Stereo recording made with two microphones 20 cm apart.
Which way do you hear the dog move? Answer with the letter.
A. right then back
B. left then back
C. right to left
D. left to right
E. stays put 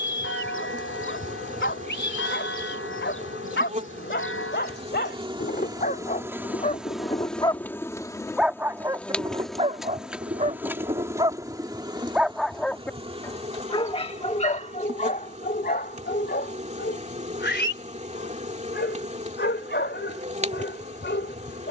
A.